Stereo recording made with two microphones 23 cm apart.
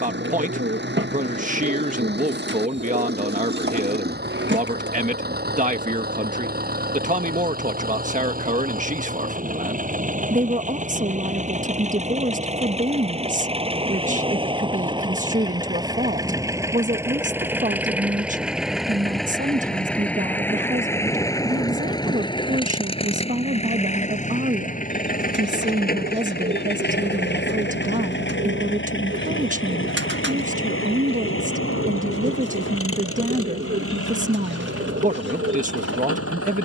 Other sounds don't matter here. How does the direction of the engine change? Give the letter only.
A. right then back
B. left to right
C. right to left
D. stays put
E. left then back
C.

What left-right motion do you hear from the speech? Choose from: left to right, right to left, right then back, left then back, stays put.
stays put.